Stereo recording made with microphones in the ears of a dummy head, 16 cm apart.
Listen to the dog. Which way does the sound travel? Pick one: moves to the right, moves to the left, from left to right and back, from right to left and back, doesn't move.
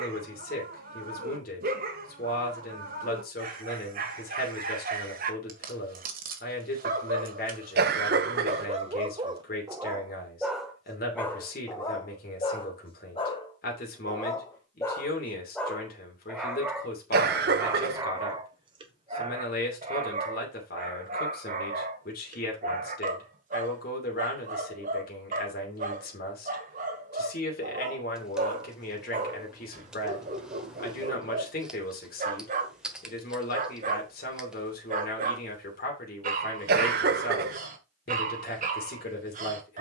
from right to left and back.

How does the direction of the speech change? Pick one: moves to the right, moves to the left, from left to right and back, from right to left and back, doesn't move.
doesn't move.